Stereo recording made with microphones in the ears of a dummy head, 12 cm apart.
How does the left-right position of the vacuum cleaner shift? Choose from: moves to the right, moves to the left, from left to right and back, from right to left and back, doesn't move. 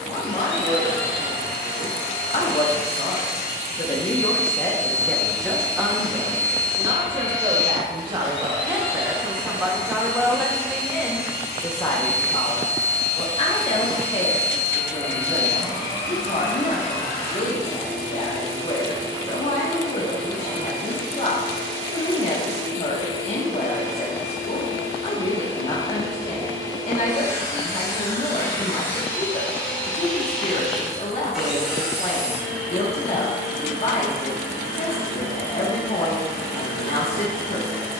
moves to the right.